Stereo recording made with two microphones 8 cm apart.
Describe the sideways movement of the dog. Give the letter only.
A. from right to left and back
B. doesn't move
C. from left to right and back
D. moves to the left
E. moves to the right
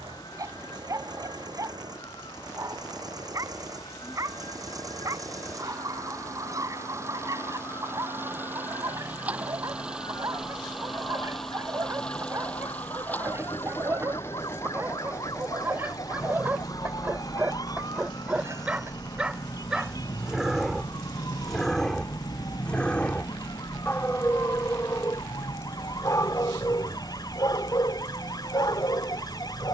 D.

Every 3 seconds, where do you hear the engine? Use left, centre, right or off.
right, right, right, centre, left, left, left, left, left, left.